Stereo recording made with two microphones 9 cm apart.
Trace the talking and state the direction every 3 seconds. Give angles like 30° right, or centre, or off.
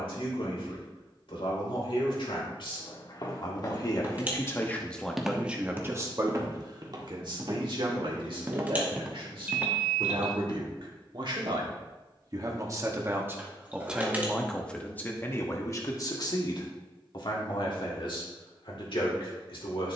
70° left, 20° left, 60° right, 60° right, 20° right, 40° left, 60° left.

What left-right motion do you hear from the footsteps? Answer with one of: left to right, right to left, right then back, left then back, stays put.
right then back.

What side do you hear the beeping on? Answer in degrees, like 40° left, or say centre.
20° right.